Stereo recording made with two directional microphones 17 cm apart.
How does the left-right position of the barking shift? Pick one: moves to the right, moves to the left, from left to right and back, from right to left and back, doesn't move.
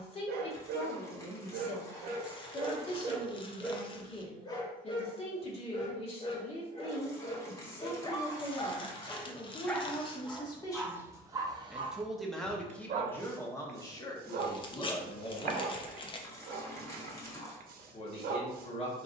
from right to left and back.